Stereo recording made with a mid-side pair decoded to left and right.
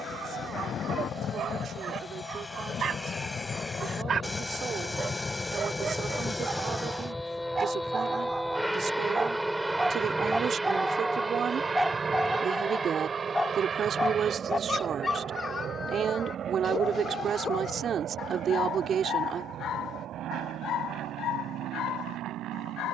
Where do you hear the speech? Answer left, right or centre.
right.